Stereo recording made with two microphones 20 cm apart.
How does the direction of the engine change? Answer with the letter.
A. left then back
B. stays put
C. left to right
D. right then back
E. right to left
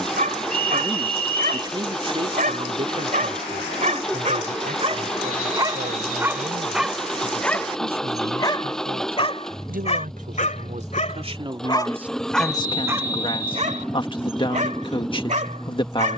B.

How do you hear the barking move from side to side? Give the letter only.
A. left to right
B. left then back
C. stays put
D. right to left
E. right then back
B.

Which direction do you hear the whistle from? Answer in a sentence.
You can hear the whistle on the left.